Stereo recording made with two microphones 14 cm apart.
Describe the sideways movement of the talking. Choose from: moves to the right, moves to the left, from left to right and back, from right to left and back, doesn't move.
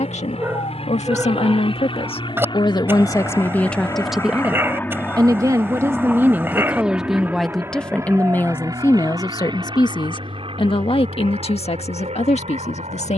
from left to right and back.